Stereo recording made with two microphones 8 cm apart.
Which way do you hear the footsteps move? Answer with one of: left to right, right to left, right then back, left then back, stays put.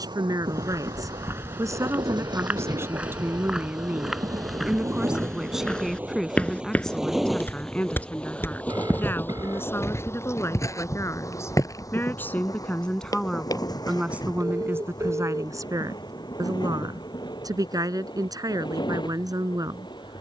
right to left.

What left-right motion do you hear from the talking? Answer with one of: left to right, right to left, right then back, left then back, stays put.
left then back.